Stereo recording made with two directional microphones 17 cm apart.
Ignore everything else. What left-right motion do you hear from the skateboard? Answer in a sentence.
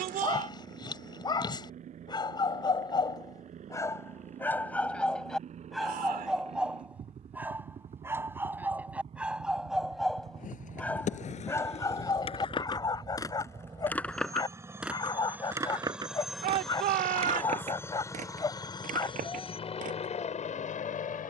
In this clip you hear the skateboard travel towards the right.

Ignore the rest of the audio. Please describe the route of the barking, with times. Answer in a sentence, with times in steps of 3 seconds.
In this clip you hear the barking on the left from 0 s, in the centre from 3 s and on the left from 12 s.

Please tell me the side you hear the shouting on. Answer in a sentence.
In this clip you hear the shouting on the right.